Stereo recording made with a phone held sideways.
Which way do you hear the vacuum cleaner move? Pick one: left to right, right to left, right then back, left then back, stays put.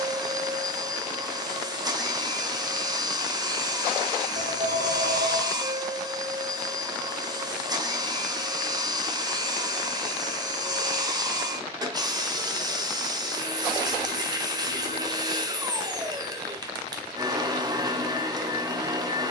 stays put.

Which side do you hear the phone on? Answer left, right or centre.
right.